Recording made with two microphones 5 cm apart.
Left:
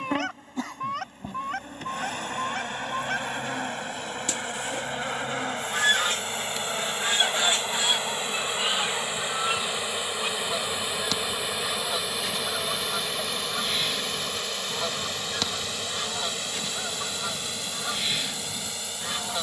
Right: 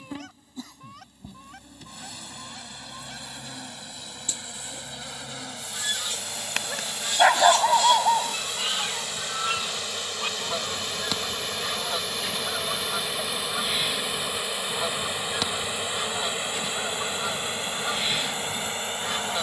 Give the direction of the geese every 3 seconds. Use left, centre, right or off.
left, left, left, centre, centre, centre, centre.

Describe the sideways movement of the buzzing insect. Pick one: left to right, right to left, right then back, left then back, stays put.
left to right.